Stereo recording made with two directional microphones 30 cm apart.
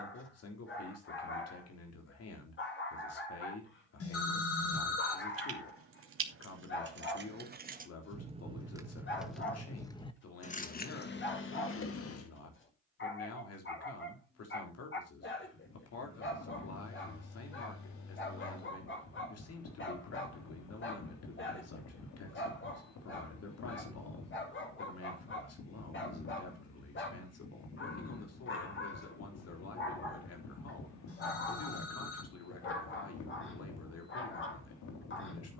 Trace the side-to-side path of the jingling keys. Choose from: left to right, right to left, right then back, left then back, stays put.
right to left.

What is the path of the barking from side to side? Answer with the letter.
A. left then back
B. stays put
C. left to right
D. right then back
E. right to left
B.